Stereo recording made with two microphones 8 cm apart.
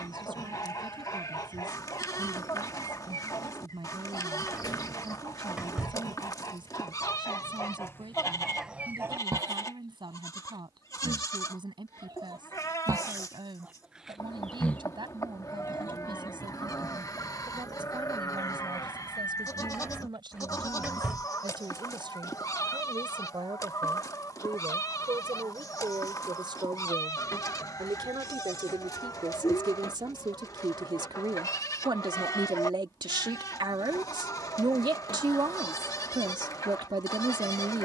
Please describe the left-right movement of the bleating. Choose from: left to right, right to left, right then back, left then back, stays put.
stays put.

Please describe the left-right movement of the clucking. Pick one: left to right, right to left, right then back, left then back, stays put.
right then back.